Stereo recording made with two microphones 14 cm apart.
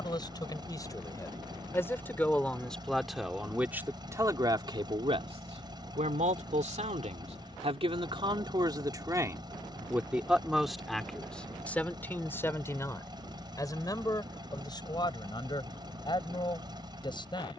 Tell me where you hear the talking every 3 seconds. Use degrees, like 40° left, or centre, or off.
20° left, 20° right, 50° right, centre, 20° left, 30° left.